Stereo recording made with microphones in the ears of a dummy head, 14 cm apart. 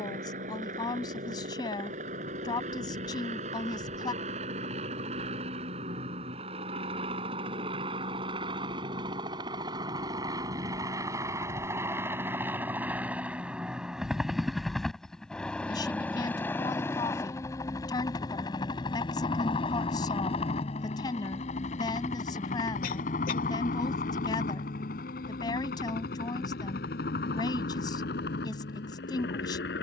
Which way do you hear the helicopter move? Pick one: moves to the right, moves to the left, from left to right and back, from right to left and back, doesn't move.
moves to the left.